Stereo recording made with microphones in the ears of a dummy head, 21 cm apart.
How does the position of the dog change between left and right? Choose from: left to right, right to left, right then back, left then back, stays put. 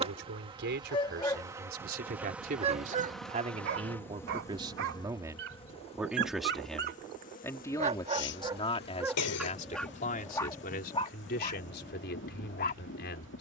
right then back.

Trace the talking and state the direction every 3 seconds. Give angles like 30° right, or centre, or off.
40° right, 20° right, 10° left, 40° left, 50° left.